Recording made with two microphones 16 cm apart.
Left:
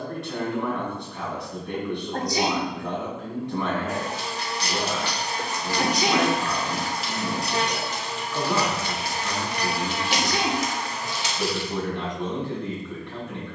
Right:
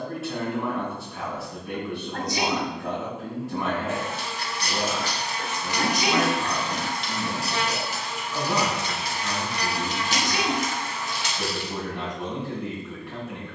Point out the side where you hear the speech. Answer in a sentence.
You can hear the speech in the centre.